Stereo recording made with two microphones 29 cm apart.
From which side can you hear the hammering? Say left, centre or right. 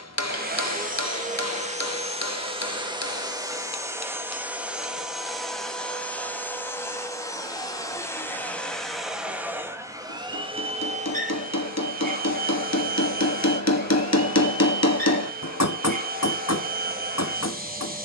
left.